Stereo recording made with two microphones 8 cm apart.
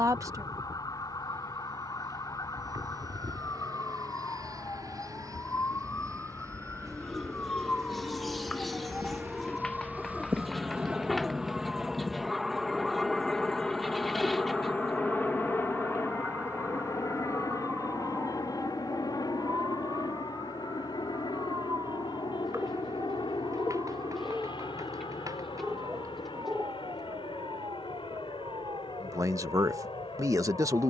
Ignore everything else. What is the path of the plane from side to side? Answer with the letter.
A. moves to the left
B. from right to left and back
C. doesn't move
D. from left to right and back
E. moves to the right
A.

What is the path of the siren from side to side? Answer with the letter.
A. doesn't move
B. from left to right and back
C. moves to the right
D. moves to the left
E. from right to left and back
C.